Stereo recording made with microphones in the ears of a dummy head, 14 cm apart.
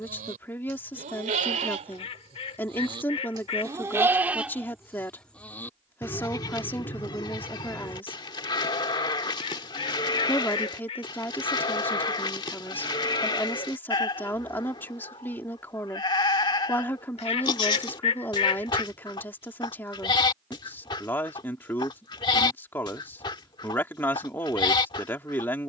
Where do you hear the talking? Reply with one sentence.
You can hear the talking in the centre.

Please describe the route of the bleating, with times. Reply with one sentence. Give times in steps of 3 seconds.
In this clip you hear the bleating on the right from 0 s, in the centre from 3 s and on the left from 6 s.